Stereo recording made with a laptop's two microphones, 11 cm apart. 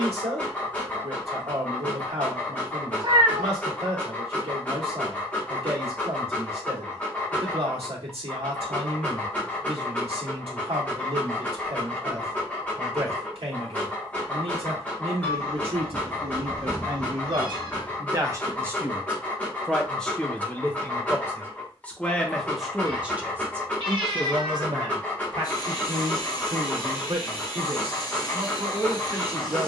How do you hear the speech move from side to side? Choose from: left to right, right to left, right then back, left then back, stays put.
left then back.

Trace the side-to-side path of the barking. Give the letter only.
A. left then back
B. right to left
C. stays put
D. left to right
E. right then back
C.